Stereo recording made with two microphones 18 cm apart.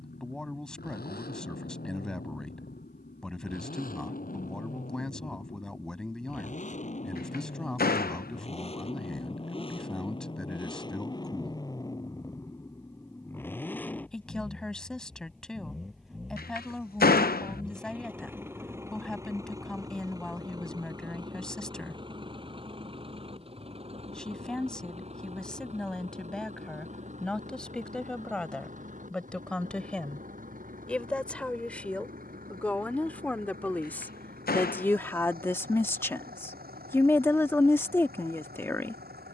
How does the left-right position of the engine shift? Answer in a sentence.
In this clip you hear the engine travel towards the right.